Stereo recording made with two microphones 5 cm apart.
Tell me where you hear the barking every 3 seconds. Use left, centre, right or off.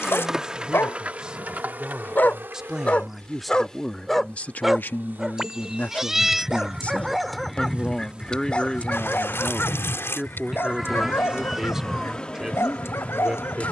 left, centre, centre, left, left.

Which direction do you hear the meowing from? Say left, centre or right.
centre.